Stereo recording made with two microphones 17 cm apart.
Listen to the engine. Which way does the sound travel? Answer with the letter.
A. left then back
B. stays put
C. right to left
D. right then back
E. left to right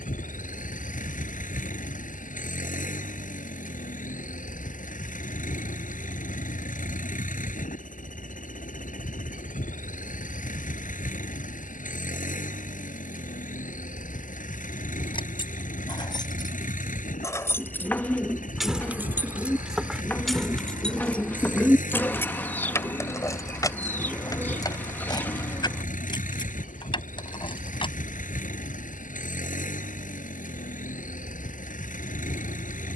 B.